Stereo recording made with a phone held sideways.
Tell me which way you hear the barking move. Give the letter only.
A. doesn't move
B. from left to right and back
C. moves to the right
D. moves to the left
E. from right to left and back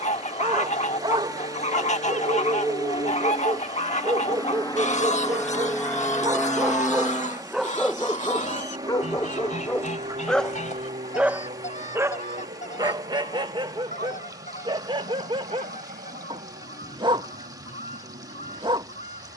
E.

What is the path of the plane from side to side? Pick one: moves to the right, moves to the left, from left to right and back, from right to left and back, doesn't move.
moves to the right.